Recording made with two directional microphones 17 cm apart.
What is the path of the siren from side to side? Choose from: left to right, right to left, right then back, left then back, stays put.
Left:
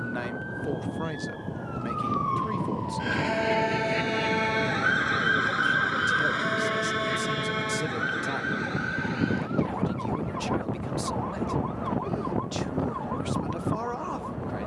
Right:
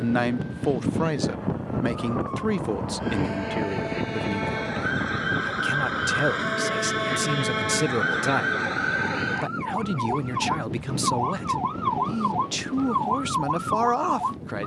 left to right.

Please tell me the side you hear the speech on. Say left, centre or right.
right.